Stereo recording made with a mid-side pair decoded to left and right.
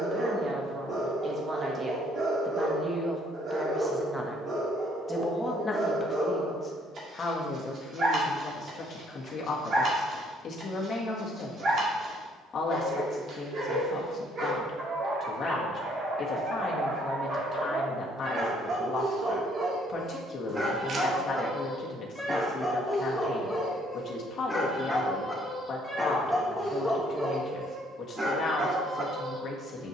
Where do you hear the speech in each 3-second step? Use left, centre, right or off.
right, centre, left, left, left, left, left, left, left, left.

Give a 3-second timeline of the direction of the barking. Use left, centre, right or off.
right, right, right, right, right, right, right, centre, centre, right.